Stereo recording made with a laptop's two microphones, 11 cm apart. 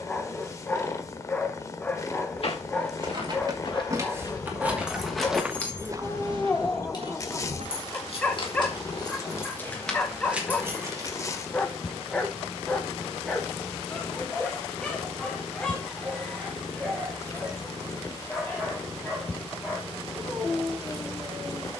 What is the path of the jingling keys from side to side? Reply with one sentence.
You can hear the jingling keys go left and come back.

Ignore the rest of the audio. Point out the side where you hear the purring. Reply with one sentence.
In this clip you hear the purring on the left.